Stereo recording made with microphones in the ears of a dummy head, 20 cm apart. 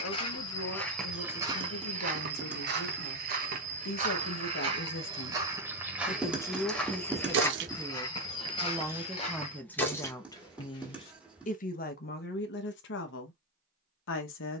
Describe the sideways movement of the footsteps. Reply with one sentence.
You can hear the footsteps go right and come back.